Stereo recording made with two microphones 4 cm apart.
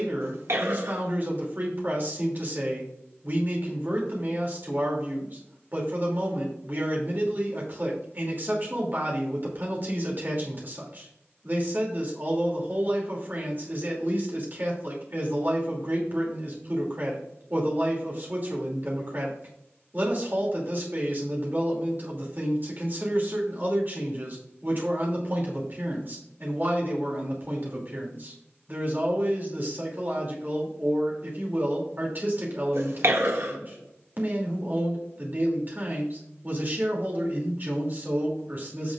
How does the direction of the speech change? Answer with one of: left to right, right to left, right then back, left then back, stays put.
stays put.